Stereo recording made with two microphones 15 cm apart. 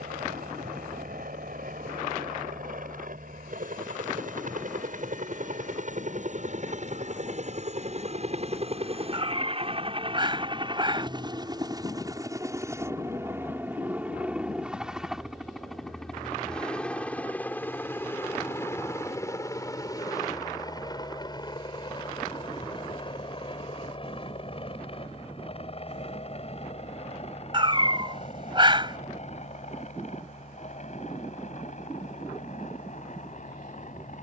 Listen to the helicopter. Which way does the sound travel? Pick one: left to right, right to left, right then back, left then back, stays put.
right to left.